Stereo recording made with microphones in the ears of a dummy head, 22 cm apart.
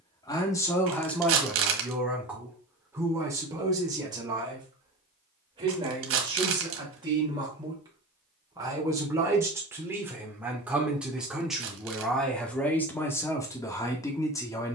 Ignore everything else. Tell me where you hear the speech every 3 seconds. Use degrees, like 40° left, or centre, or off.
centre, 20° right, 20° right, 10° right, 10° left.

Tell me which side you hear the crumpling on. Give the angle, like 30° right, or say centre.
60° right.